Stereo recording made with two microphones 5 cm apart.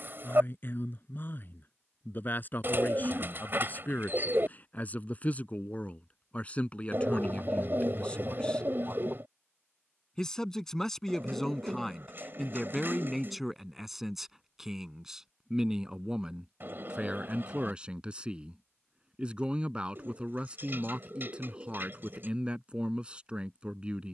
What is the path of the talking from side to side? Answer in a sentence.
You can hear the talking travel towards the right.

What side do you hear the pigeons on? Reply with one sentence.
In this clip you hear the pigeons on the right.